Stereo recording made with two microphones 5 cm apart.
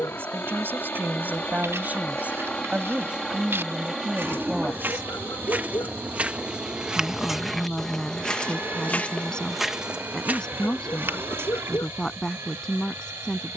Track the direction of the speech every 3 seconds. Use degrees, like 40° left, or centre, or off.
40° right, 10° right, 10° left, 10° left, 10° left.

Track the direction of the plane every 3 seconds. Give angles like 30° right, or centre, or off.
30° left, centre, 30° right, 40° right, 50° right.